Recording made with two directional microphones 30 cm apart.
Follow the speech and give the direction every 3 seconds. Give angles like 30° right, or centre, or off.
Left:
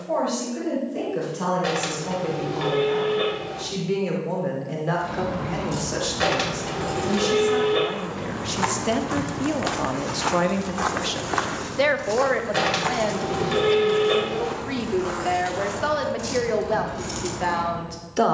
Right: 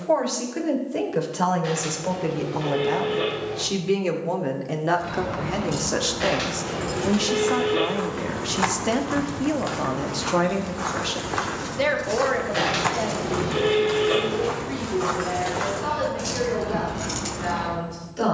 60° right, 50° right, 30° right, centre, 40° left, 60° left.